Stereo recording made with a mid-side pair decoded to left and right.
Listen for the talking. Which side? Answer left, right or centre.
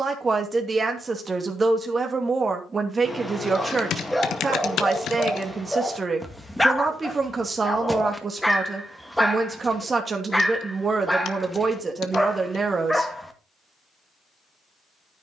right.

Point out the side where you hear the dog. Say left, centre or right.
centre.